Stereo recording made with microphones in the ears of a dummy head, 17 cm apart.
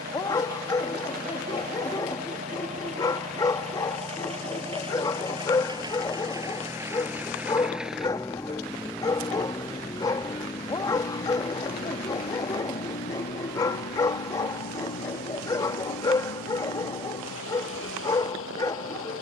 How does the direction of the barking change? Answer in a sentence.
You can hear the barking stay in one place.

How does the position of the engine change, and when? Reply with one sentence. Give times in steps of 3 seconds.
You can hear the engine on the right from 0 s, in the centre from 6 s and on the left from 9 s.